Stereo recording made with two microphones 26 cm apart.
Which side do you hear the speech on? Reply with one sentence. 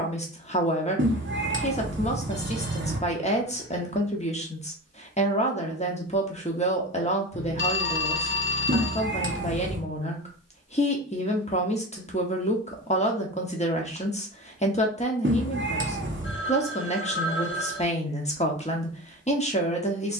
In this clip you hear the speech on the left.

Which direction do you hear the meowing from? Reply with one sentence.
You can hear the meowing on the right.